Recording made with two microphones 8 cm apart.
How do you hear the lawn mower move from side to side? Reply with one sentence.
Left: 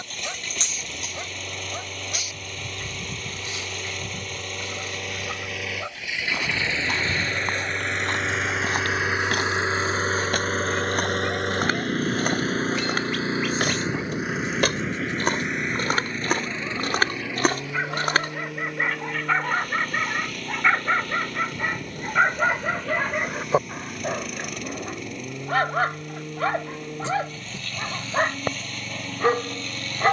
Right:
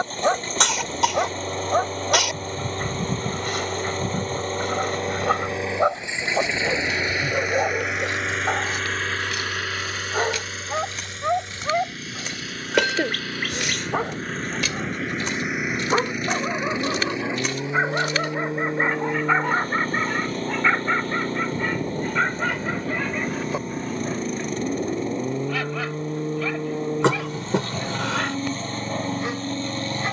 You can hear the lawn mower move from right to left and back again.